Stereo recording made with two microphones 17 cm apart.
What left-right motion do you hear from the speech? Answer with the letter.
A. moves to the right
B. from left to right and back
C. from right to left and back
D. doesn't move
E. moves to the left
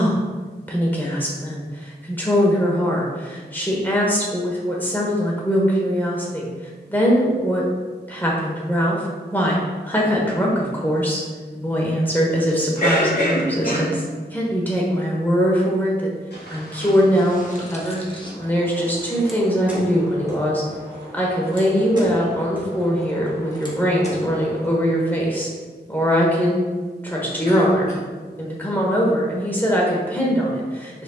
D.